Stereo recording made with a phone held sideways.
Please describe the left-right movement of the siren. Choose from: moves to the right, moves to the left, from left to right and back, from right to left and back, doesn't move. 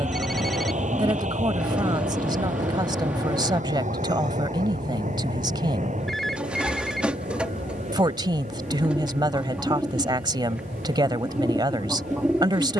moves to the left.